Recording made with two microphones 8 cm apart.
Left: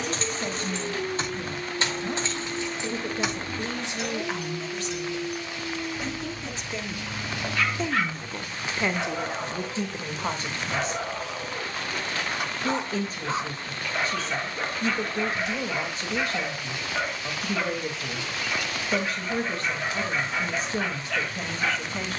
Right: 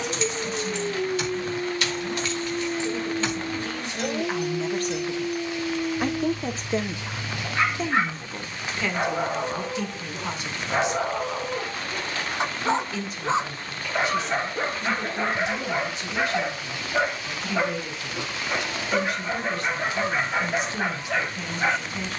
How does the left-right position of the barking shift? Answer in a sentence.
In this clip you hear the barking stay in one place.